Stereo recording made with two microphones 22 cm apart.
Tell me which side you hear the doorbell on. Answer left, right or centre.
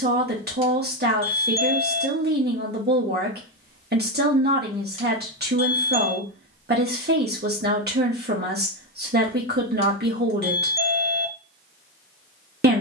right.